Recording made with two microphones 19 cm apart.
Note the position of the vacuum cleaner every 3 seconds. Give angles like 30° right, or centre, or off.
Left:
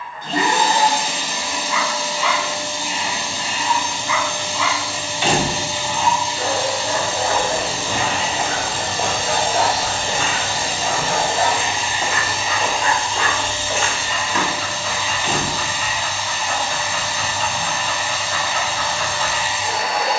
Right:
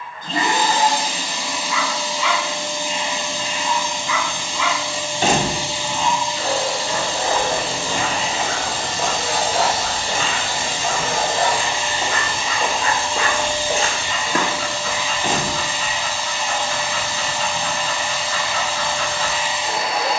80° left, 80° left, 70° left, 40° left, 10° right, 30° right, 30° right.